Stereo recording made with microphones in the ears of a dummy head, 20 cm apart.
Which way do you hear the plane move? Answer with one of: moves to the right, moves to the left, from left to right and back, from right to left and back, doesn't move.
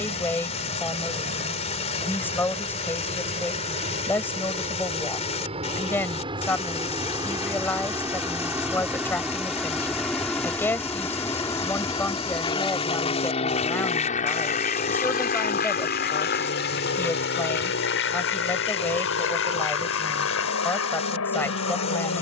moves to the left.